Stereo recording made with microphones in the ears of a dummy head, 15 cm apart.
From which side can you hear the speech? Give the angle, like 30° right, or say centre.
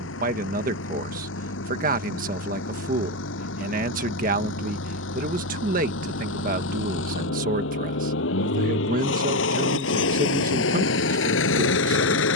50° right.